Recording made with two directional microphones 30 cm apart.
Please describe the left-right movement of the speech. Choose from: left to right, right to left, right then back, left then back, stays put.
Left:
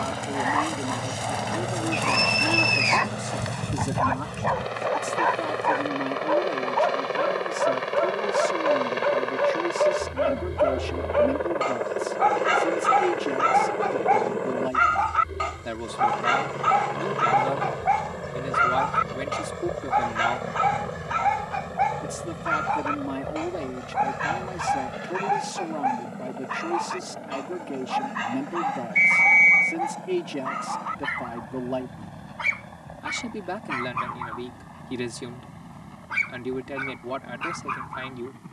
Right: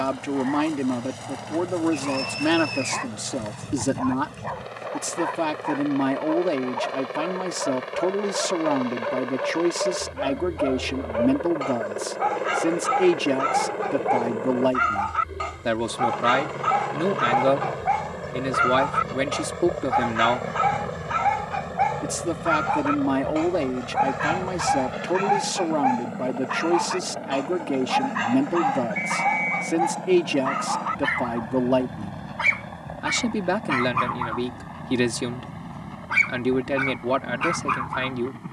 stays put.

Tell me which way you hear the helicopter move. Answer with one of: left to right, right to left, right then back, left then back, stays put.
left to right.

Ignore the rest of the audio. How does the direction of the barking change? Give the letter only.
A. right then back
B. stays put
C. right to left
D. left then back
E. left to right
E.